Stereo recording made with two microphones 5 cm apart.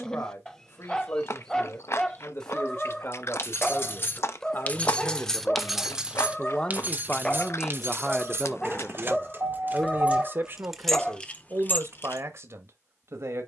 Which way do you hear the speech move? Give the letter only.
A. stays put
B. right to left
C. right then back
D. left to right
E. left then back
D.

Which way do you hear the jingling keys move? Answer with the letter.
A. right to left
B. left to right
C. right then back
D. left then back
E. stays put
C.